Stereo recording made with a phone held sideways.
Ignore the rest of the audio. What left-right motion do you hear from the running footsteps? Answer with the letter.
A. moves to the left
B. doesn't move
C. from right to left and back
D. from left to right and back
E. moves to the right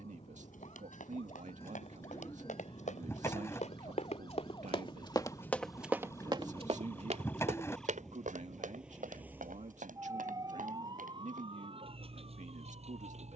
E.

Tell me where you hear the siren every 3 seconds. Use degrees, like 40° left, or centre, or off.
50° left, 30° left, 10° left, 30° right, 50° right.